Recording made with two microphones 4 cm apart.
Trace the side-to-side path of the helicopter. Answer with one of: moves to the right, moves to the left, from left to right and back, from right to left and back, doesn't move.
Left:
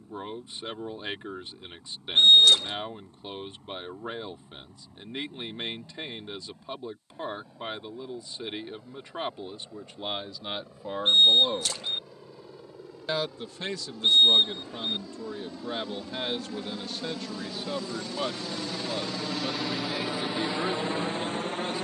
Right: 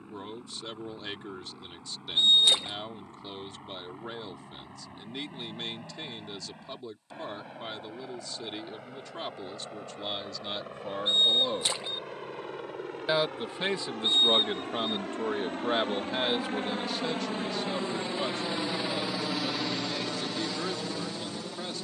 moves to the left.